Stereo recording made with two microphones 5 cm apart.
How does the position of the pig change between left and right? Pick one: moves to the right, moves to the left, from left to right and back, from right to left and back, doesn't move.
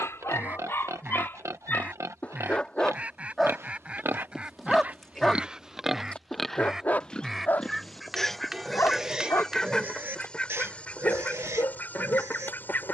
from right to left and back.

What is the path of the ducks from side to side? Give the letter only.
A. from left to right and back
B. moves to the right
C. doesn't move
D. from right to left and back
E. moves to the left
E.